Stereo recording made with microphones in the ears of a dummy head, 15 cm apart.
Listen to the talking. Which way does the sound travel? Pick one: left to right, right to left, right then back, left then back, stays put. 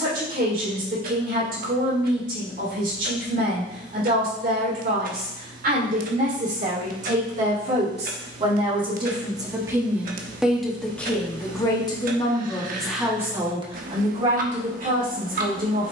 left then back.